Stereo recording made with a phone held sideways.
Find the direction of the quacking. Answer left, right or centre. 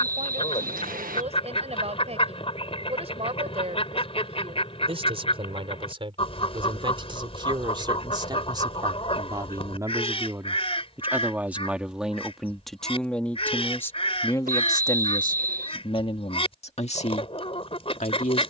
left.